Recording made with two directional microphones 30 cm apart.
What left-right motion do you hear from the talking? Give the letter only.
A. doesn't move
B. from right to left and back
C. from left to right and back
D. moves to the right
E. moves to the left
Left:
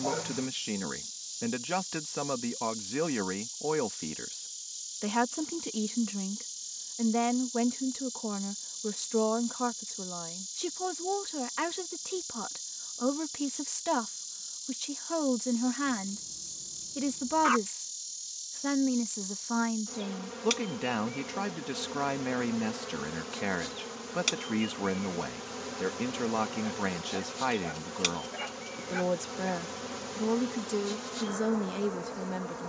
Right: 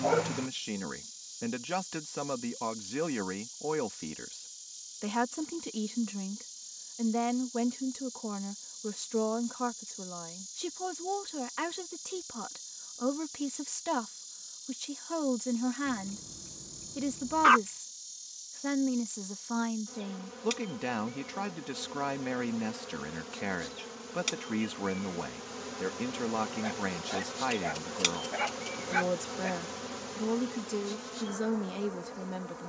A.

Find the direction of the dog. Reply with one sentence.
In this clip you hear the dog on the right.